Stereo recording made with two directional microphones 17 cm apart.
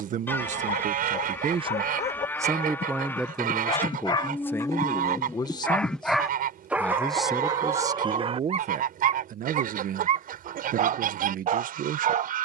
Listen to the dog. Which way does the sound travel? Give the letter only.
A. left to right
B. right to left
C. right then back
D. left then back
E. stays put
A.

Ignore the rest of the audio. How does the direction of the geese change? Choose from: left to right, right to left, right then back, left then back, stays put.
stays put.